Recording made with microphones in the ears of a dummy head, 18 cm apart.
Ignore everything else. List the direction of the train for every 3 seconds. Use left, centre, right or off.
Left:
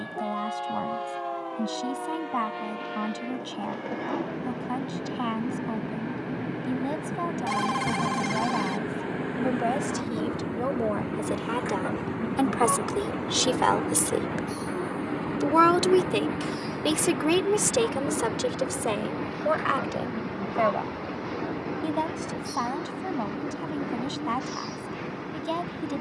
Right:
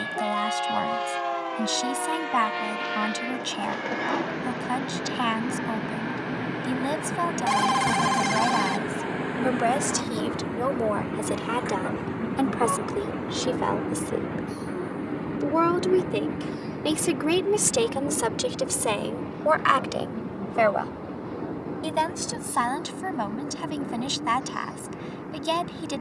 right, right, right, centre, centre, left, left, left, left.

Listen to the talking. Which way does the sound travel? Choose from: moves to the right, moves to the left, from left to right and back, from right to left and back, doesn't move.
from right to left and back.